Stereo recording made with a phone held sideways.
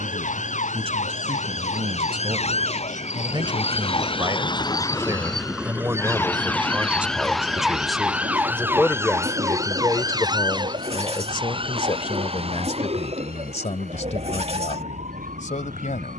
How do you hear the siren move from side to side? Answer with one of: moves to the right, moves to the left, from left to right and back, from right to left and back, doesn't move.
moves to the right.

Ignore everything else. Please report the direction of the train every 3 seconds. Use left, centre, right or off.
left, left, right, right, right, right.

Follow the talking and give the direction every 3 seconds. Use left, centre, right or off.
right, right, centre, left, left, left.